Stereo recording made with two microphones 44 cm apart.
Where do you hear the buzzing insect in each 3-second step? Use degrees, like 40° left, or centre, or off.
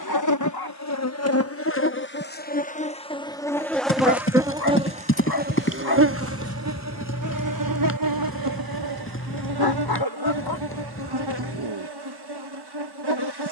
30° left, 10° right, 40° right, 60° right, 60° right.